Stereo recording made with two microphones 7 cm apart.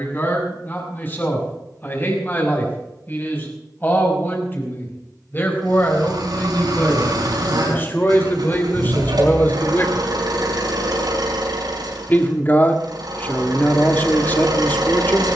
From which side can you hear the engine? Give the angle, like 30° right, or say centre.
70° right.